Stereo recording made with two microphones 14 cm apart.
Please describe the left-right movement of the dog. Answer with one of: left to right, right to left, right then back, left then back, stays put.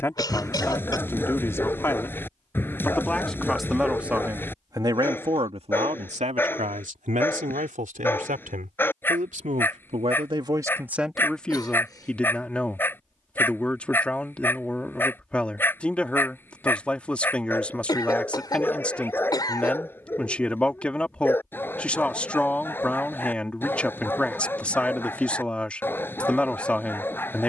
stays put.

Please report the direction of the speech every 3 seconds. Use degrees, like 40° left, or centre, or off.
20° left, 20° right, 70° right, 30° right, 10° left, 10° left, 10° left, 10° left, 10° left.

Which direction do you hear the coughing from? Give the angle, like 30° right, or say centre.
30° left.